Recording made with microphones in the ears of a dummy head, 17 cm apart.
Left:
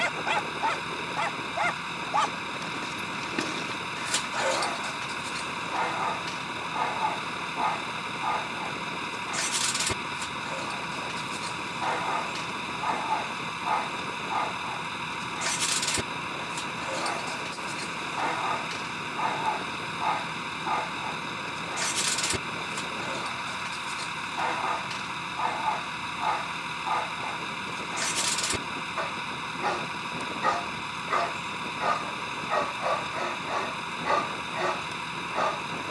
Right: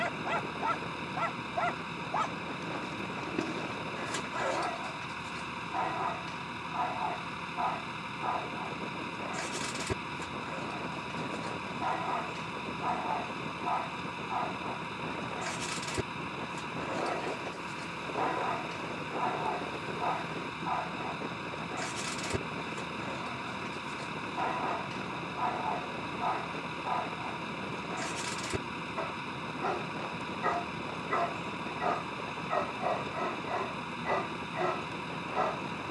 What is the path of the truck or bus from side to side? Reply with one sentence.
You can hear the truck or bus stay put.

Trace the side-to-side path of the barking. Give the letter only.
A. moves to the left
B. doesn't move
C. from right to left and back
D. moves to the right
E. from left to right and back
B.